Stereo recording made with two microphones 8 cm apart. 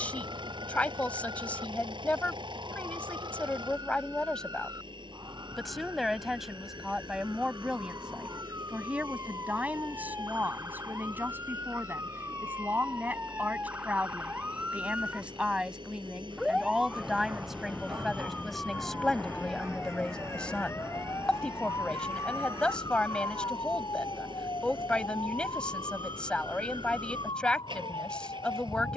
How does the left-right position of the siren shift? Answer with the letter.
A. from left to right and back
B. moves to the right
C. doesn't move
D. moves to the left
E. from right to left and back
D.